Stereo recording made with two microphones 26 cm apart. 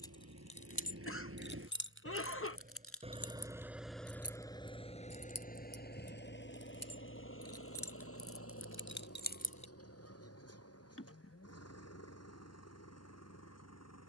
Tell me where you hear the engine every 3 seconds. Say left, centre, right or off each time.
right, centre, left, left, left.